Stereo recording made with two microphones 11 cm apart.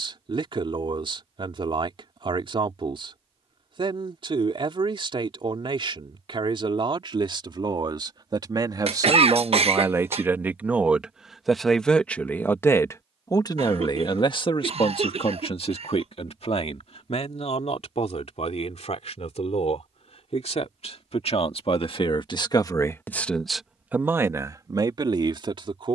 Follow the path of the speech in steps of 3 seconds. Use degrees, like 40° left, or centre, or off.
50° right, 50° right, 50° right, 20° right, 40° left, 70° left, 80° left, 30° left, 40° right.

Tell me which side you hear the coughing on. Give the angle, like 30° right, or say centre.
70° right.